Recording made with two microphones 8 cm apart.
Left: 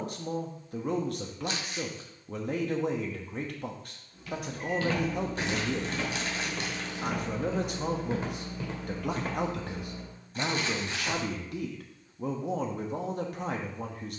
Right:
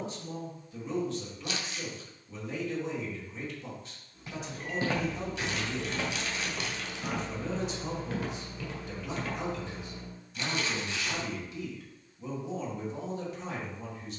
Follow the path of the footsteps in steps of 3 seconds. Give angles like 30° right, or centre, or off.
off, 20° right, 10° left, 40° left, off.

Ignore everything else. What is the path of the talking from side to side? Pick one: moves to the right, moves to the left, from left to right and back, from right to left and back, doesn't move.
doesn't move.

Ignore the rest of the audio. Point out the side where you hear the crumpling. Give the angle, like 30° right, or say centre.
40° left.